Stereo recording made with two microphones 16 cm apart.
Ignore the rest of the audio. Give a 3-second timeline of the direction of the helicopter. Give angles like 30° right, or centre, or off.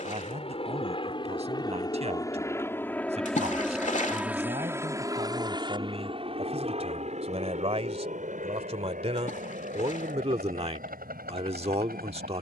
30° left, 10° right, 50° right, 60° right.